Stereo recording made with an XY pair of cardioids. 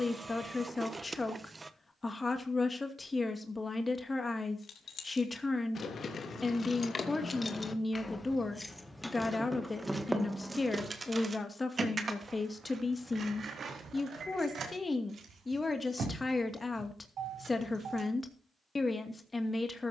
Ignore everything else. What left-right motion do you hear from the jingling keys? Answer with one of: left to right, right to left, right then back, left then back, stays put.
left to right.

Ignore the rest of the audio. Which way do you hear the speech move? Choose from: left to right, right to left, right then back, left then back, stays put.
stays put.